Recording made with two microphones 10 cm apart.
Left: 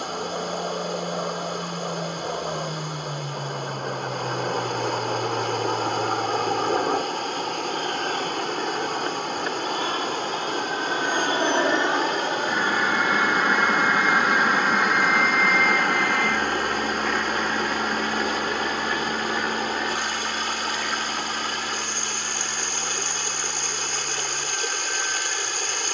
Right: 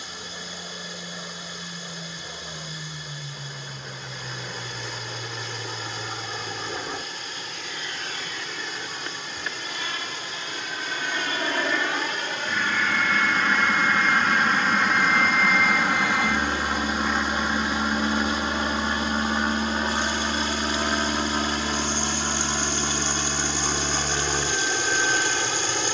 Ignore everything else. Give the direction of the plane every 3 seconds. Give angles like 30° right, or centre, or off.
60° left, 60° left, 50° left, 30° left, 20° left, 10° right, 30° right, 40° right, 50° right.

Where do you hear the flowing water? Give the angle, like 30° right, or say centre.
60° left.